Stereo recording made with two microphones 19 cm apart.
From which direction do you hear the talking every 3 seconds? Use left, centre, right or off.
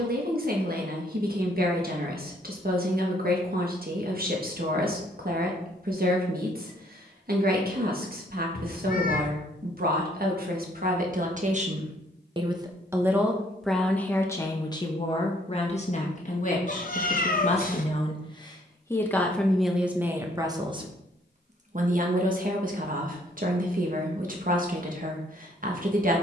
right, right, right, right, centre, left, centre, right, right.